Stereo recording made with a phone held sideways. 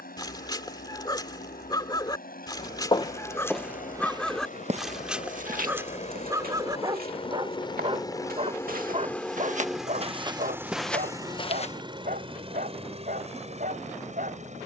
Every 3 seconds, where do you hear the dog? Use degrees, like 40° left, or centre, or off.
20° left, centre, 30° right, 50° right, 60° right.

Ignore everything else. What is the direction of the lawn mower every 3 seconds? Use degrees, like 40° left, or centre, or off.
70° left, 60° left, 30° left, 10° right, 40° right.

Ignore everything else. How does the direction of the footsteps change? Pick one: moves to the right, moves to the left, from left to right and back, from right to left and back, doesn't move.
from left to right and back.